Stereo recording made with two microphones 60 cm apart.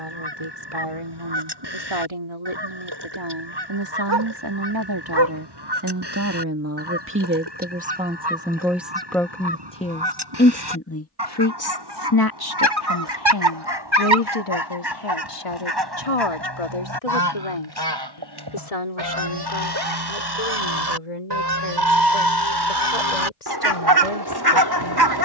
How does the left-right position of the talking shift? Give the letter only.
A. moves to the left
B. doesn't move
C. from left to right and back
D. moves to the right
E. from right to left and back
A.